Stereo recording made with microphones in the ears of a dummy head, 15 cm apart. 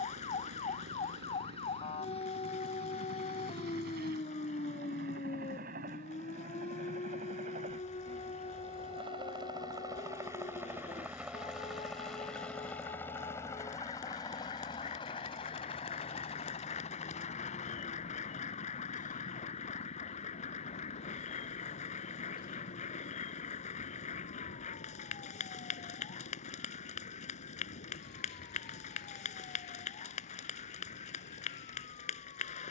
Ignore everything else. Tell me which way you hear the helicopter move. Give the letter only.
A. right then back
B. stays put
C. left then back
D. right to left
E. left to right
D.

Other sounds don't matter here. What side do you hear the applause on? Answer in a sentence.
You can hear the applause on the left.